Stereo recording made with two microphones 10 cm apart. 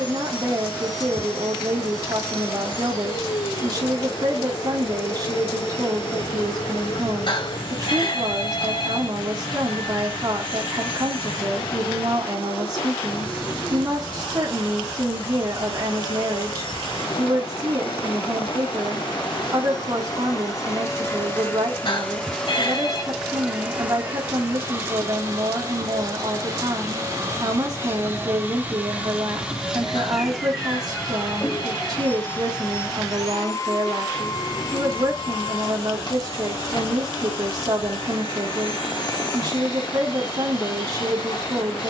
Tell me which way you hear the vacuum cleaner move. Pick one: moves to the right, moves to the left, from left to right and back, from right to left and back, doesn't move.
from left to right and back.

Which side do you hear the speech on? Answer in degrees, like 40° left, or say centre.
40° right.